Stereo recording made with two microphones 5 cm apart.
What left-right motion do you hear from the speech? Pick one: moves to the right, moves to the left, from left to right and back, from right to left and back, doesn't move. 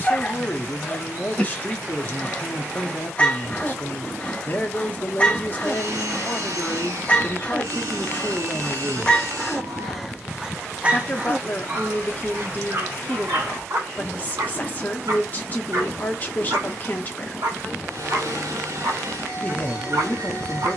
doesn't move.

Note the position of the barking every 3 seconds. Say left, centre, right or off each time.
left, left, left, centre, right, right, right.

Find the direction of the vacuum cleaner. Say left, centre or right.
right.